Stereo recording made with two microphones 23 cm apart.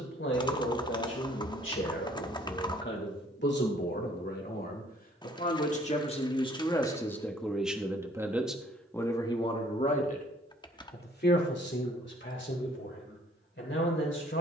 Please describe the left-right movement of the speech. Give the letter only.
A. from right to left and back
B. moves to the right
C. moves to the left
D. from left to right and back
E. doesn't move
D.